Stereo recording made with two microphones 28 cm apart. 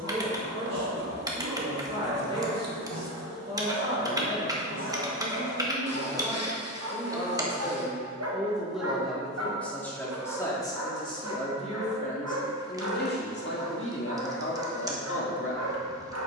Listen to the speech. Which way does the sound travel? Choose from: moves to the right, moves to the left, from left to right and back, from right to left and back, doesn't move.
moves to the left.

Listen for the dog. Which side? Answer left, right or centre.
right.